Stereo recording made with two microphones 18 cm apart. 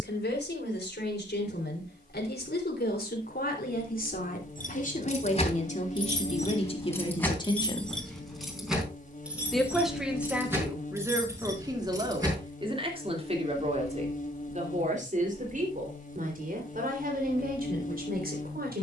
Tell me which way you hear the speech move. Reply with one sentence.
You can hear the speech move from left to right.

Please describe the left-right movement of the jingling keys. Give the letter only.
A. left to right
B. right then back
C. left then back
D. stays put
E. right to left
A.